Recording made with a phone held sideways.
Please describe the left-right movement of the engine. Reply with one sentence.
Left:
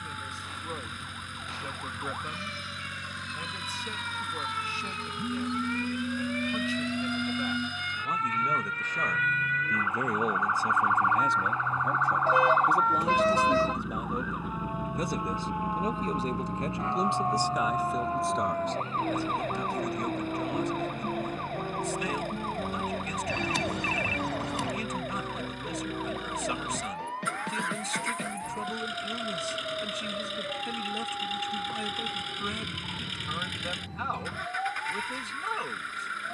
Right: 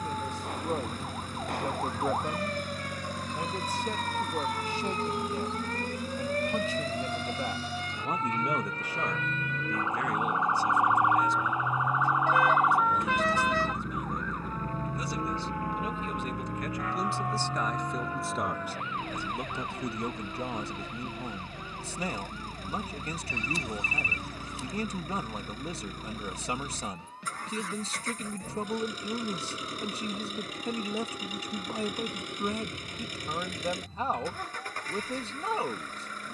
In this clip you hear the engine stay put.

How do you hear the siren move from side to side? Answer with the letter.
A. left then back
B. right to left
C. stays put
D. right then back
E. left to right
B.